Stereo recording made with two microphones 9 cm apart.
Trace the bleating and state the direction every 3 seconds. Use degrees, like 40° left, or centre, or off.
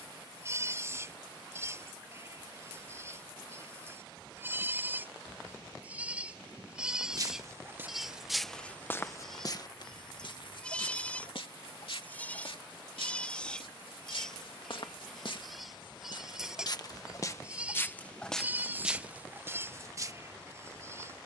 30° right, 20° right, 10° right, 10° left, 10° left, 10° right, 20° right.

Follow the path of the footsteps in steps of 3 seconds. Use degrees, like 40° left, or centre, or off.
off, off, 10° right, 60° left, 70° left, 40° left, 10° right.